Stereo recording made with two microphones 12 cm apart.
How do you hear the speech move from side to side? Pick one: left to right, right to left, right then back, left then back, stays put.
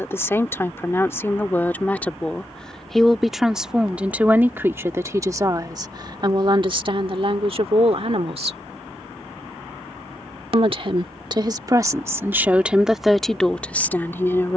right then back.